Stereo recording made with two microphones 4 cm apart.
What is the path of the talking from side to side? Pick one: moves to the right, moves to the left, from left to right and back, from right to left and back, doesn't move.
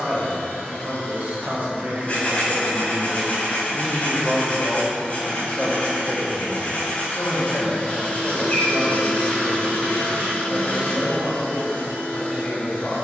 moves to the left.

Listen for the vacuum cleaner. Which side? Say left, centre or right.
left.